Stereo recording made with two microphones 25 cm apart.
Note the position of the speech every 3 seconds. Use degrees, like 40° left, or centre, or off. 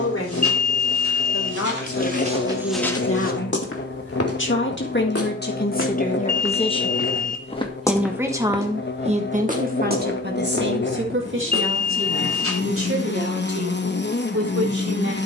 70° left, 50° left, 10° left, 40° right, 60° right.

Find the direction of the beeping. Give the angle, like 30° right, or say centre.
30° left.